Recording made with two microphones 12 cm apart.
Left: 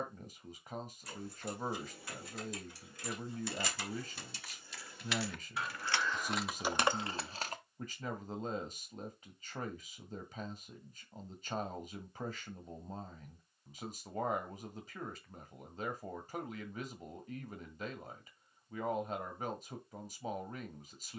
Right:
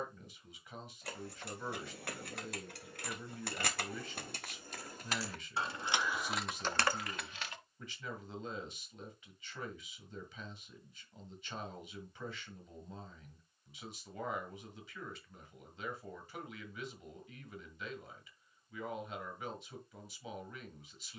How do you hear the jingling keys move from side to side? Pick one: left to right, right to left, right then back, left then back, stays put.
right to left.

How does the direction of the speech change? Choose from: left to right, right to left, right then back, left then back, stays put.
stays put.